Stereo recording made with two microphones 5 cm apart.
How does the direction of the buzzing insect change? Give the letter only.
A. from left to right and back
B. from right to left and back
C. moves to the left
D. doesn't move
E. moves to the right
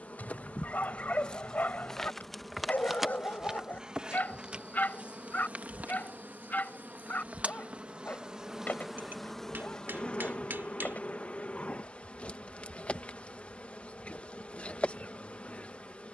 A.